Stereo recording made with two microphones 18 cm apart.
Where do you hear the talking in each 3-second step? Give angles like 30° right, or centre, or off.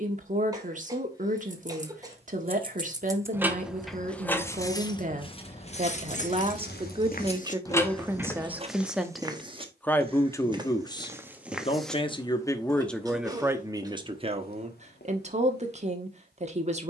50° right, 40° right, 20° right, 20° left, 10° right, 40° right.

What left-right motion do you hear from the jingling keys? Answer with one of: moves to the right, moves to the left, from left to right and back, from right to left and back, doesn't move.
from right to left and back.